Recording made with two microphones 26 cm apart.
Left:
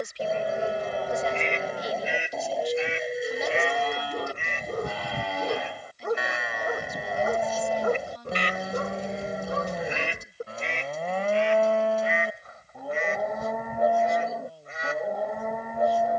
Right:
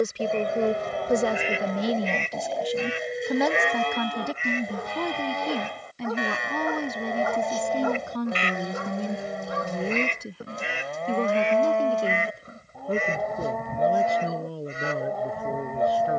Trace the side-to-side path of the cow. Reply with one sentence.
In this clip you hear the cow stay in one place.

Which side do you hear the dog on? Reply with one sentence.
You can hear the dog on the left.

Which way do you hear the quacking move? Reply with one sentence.
In this clip you hear the quacking go left and come back.